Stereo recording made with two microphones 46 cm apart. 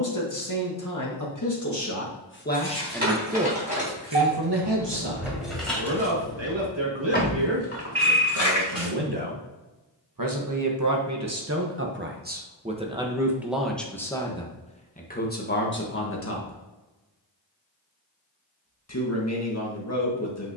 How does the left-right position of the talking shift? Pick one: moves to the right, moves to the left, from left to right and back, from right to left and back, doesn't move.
from left to right and back.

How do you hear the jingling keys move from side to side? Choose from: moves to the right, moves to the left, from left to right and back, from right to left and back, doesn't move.
moves to the left.